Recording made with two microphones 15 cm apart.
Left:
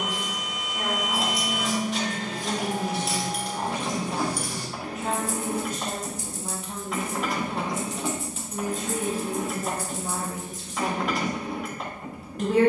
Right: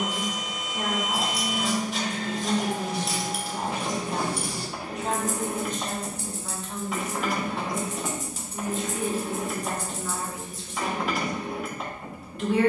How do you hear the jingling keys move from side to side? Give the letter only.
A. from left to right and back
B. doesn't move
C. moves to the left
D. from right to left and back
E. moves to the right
A.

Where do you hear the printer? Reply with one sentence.
You can hear the printer in the centre.